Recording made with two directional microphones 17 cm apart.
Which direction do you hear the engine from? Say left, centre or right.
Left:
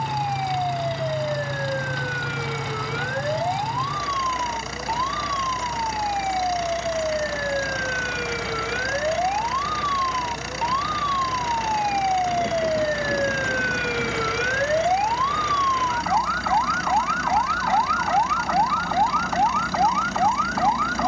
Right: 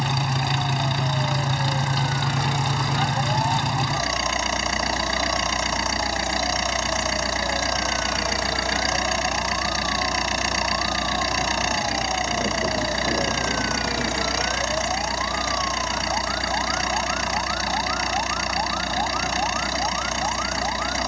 right.